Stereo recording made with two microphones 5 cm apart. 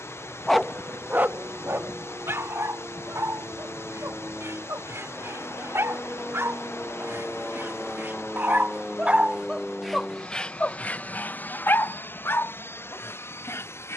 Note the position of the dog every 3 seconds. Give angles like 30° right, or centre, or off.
50° right, 70° right, 50° right, 20° left, 60° left.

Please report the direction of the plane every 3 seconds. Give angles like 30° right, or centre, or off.
50° right, 40° right, 20° right, 20° left, 50° left.